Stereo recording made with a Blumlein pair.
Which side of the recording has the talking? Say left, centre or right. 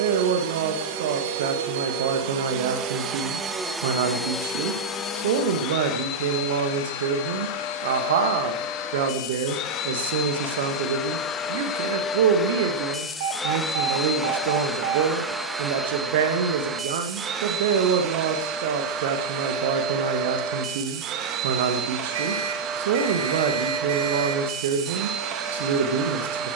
right.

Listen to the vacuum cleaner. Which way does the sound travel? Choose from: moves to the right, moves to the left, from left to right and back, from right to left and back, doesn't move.
from right to left and back.